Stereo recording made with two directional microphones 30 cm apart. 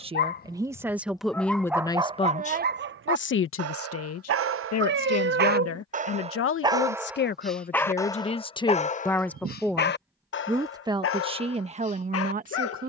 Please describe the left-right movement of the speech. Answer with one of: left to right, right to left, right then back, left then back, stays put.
left then back.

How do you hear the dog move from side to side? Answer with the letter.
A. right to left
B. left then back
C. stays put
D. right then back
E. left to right
D.